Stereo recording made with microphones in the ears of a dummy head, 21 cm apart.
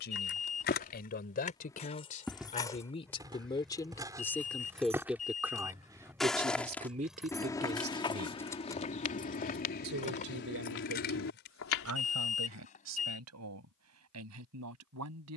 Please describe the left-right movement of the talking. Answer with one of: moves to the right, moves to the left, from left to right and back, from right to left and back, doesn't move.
moves to the right.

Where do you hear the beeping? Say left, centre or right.
left.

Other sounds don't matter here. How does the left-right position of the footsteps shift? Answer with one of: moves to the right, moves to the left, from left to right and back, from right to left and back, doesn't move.
from left to right and back.